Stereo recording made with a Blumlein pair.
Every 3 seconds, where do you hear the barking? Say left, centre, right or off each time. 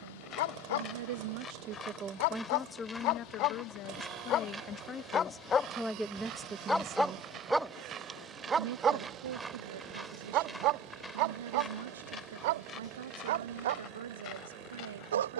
left, left, centre, right, right.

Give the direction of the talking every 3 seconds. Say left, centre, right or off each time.
right, left, right, right, right.